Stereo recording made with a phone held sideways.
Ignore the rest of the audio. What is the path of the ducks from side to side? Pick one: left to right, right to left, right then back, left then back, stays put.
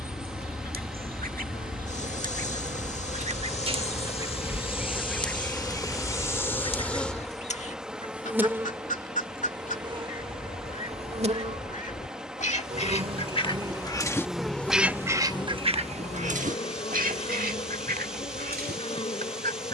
left then back.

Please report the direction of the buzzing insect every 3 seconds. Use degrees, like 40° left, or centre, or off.
50° left, 40° left, centre, 40° right, 20° right, 40° left, 40° left.